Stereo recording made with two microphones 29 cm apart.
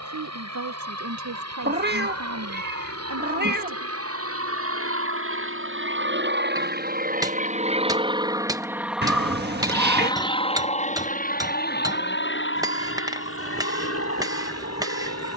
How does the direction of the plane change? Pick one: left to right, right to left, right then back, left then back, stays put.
right to left.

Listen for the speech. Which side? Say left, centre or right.
right.